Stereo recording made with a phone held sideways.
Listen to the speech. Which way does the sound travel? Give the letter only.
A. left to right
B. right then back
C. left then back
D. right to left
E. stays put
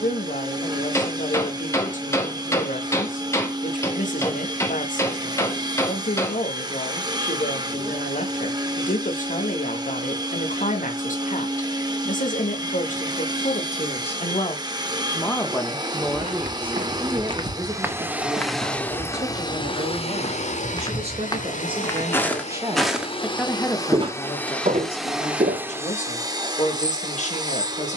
B.